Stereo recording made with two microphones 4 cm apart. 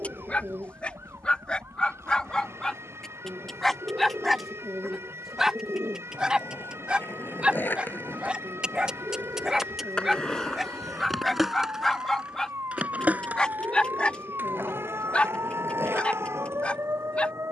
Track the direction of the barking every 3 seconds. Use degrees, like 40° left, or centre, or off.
20° left, centre, 20° right, centre, 20° left, 30° left.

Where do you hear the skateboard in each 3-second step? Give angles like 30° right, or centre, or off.
off, off, 50° left, 10° left, 40° right, 60° right.